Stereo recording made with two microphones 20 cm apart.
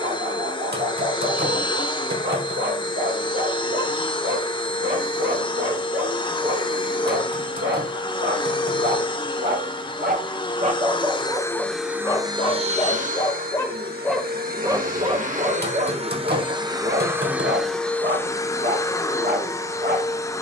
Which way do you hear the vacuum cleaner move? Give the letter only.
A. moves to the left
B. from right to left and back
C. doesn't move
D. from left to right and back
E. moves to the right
D.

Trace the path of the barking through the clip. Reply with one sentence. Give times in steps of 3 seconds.
You can hear the barking on the right from 0 s, in the centre from 12 s and on the right from 15 s.